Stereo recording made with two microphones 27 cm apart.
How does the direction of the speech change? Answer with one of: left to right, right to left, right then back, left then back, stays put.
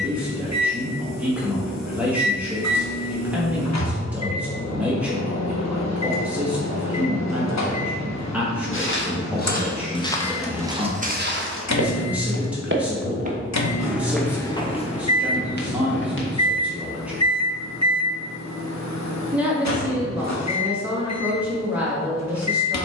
stays put.